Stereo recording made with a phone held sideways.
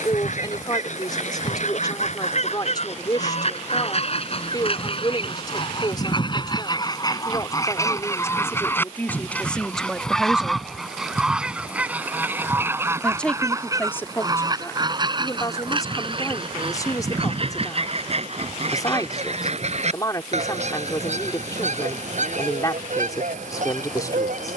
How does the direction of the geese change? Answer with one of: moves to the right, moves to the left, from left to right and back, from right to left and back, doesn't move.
moves to the right.